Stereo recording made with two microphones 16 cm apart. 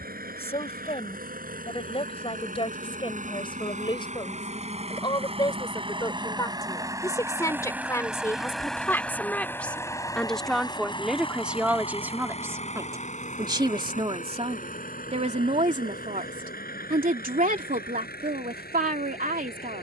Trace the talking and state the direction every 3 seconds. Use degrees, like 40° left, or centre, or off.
40° left, 30° left, 20° left, centre, 20° right, 50° right, 60° right.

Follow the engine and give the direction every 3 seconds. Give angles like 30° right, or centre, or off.
60° right, 40° right, 10° right, 20° left, 50° left, 60° left, 70° left.